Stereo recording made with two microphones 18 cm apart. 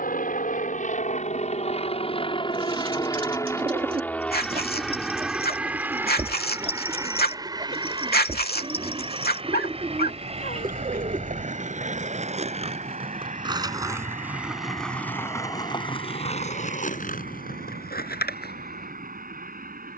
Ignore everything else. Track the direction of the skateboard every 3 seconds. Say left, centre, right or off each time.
off, off, right, right, right, left, left.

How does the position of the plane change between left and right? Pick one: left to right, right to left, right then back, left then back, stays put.
left to right.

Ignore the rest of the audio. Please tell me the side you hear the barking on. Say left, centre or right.
left.